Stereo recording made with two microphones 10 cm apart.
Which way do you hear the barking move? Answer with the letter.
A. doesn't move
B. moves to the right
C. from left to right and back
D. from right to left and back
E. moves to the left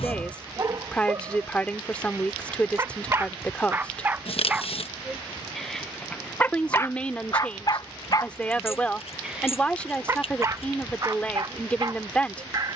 D.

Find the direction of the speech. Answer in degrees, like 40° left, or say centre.
10° left.